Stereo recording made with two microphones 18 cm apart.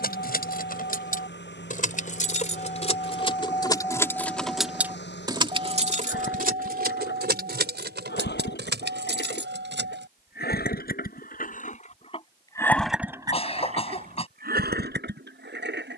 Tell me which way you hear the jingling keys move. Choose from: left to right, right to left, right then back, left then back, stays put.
left to right.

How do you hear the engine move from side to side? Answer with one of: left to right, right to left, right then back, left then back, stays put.
left to right.